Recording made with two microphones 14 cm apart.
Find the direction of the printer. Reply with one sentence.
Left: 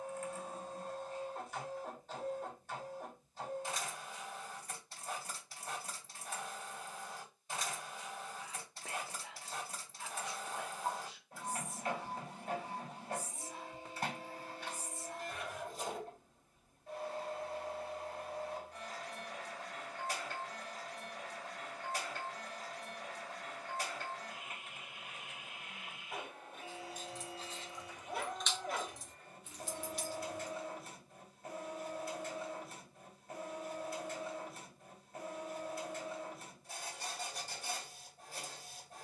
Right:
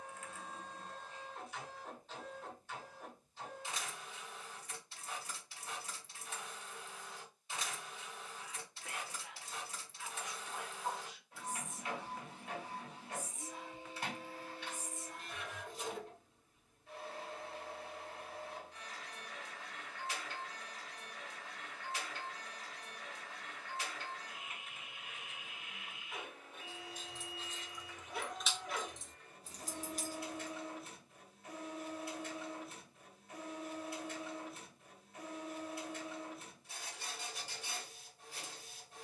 In this clip you hear the printer on the left.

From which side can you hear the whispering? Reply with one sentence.
In this clip you hear the whispering on the left.